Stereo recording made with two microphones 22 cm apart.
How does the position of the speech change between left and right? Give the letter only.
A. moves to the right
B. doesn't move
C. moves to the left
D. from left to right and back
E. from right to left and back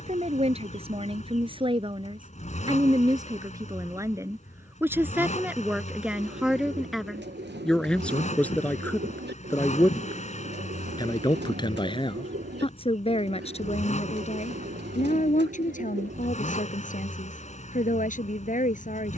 C.